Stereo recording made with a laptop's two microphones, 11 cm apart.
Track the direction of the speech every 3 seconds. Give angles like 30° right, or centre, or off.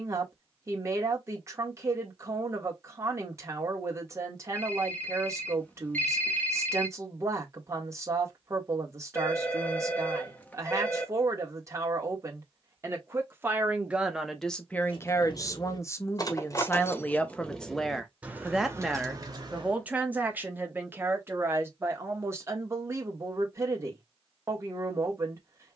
30° right, 30° right, 30° right, 30° right, 10° right, 20° left, 10° right, 20° right, 30° right.